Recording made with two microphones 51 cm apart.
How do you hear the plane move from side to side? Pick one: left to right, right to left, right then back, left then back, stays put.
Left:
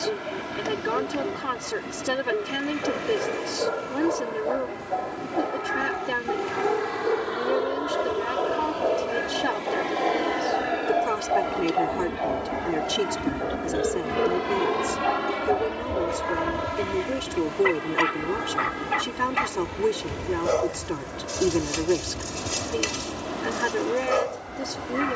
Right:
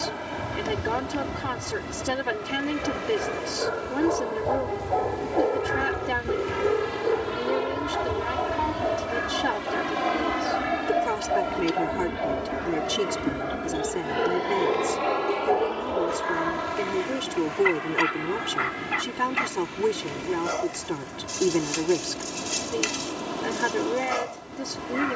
right to left.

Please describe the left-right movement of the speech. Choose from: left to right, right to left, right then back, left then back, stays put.
stays put.